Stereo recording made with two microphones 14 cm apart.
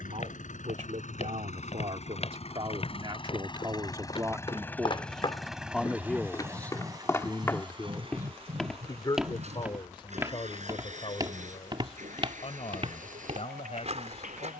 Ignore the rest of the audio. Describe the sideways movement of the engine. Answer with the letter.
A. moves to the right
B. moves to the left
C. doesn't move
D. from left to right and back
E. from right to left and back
A.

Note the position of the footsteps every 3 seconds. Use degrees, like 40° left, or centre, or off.
50° left, 40° left, 10° left, 20° right, 50° right.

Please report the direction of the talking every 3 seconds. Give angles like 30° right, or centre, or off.
50° right, 20° right, 20° left, 40° left, 50° left.